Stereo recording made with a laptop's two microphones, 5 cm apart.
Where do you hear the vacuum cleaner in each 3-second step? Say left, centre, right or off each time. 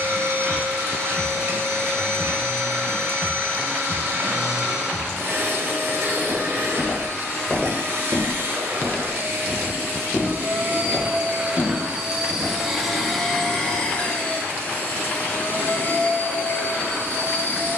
right, right, right, right, centre, left.